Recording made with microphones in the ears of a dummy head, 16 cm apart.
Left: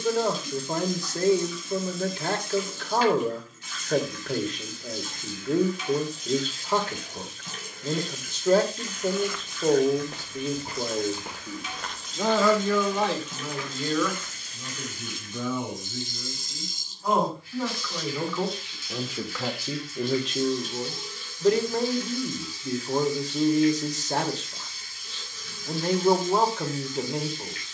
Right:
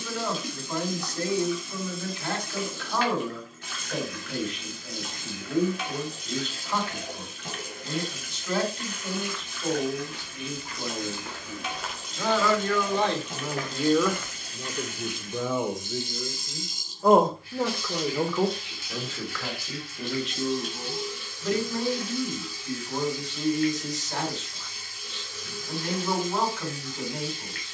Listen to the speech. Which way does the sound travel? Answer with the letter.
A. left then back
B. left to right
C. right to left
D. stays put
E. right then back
E.